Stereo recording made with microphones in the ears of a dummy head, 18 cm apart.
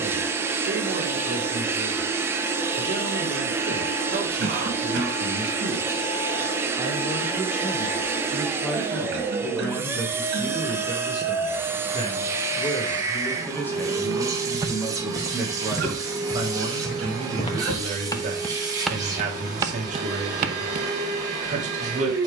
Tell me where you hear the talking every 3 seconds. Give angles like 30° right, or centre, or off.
40° right, 30° right, 10° right, 10° left, 10° left, 20° right, 40° right, 40° right.